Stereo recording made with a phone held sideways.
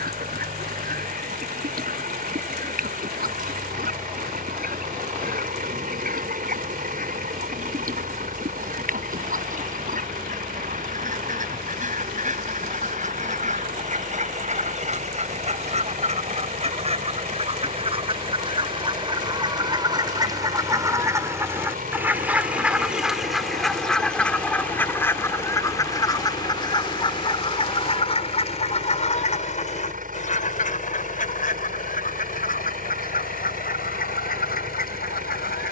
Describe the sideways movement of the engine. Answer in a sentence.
You can hear the engine stay in one place.